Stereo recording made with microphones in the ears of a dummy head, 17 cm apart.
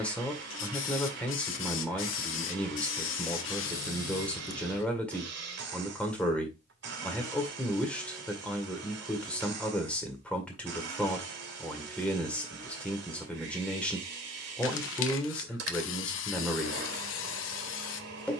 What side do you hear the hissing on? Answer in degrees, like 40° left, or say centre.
70° left.